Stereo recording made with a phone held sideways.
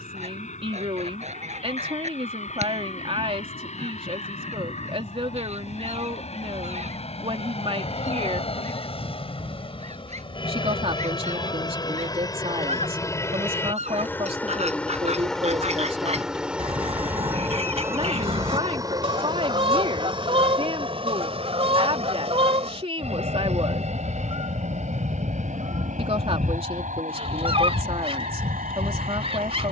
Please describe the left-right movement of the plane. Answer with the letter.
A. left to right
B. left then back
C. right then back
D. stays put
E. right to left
A.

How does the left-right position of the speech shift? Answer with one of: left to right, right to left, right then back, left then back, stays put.
stays put.